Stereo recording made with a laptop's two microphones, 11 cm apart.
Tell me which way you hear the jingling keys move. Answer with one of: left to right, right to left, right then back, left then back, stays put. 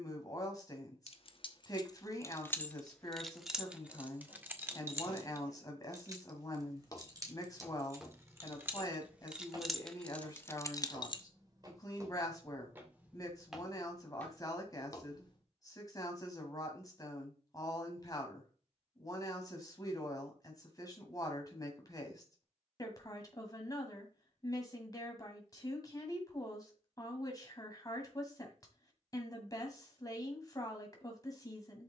right then back.